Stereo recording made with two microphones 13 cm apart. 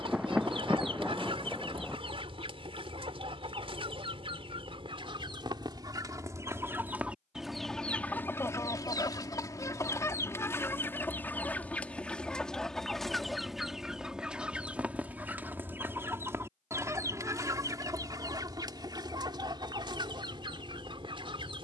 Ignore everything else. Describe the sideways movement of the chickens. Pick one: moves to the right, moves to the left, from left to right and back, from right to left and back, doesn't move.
from right to left and back.